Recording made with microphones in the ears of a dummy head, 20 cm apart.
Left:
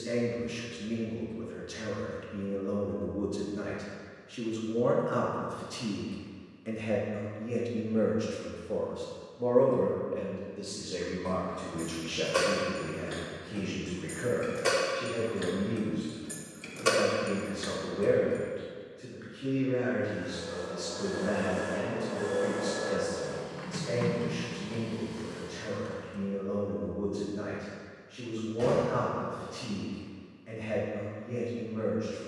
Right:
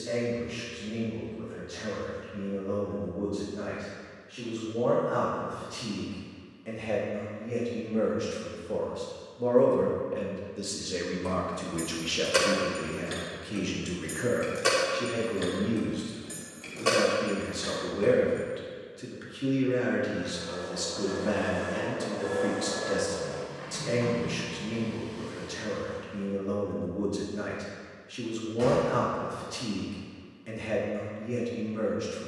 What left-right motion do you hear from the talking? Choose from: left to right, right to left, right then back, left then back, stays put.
left to right.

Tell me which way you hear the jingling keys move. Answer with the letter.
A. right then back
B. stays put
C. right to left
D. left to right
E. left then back
C.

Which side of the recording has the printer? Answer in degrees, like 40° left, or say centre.
70° left.